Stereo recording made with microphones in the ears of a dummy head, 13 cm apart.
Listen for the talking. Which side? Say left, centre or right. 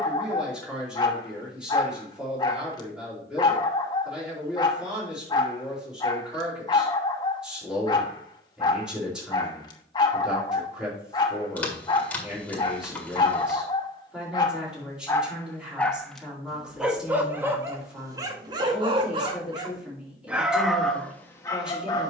centre.